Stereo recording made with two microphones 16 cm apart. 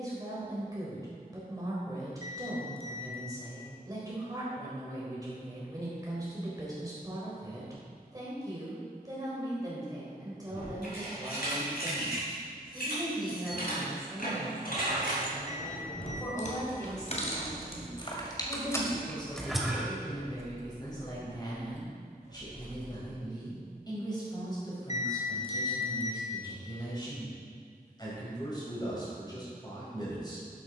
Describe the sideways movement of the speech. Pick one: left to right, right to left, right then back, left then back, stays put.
right to left.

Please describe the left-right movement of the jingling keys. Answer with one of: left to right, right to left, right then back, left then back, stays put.
left to right.